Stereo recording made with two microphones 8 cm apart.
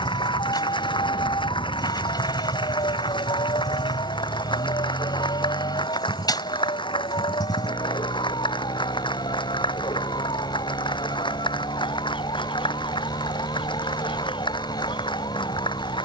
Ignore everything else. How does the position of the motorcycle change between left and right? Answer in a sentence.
You can hear the motorcycle stay put.